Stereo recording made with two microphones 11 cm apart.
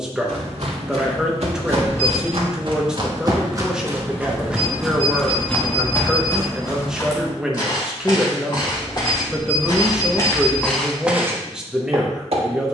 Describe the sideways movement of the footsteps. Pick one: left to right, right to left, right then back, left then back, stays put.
left then back.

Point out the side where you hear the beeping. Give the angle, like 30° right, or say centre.
20° left.